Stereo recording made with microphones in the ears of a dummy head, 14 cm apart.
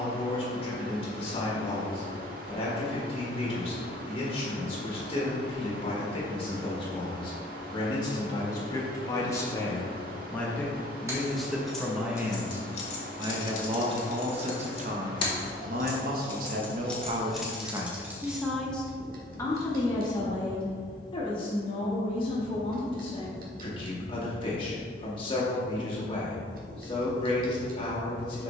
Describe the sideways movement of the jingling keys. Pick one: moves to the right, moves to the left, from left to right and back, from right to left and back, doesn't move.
from right to left and back.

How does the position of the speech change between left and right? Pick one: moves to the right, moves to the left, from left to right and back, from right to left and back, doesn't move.
from left to right and back.